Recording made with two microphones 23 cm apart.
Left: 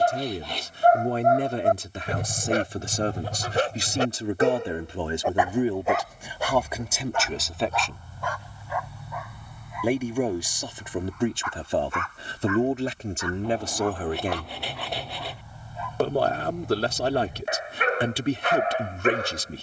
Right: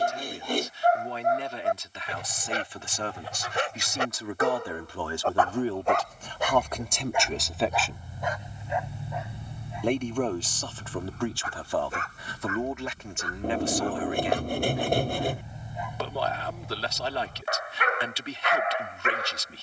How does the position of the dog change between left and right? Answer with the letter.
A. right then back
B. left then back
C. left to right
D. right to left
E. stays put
A.